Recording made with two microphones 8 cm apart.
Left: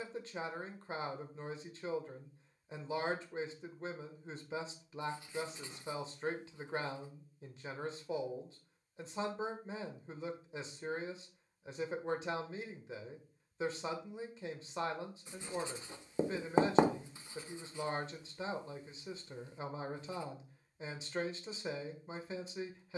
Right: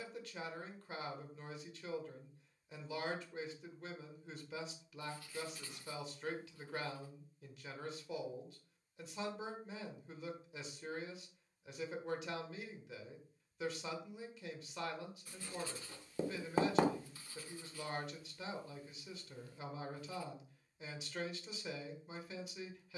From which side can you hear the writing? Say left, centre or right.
left.